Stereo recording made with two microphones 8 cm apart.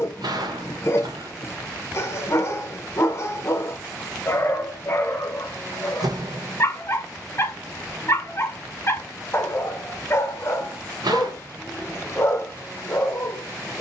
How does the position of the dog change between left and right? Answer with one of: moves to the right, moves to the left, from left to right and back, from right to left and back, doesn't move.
doesn't move.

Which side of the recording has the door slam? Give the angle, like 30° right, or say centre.
70° right.